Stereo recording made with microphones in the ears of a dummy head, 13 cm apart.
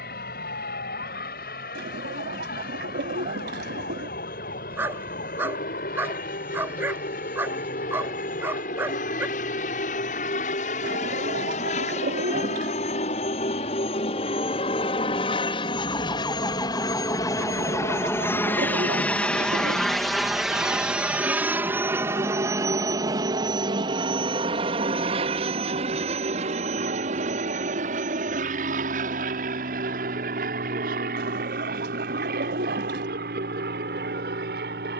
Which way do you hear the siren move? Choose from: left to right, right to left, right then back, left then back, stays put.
left to right.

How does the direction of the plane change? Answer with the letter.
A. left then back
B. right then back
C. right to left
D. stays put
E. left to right
E.